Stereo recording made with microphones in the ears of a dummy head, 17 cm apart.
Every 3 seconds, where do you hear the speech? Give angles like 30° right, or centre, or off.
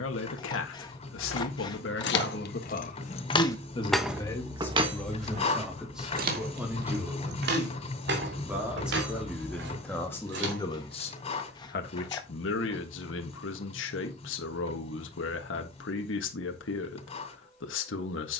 70° left, 10° left, 10° right, 20° left, 70° left, 70° left.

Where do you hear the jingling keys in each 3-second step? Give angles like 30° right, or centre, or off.
60° left, 10° right, 60° right, 60° right, off, off.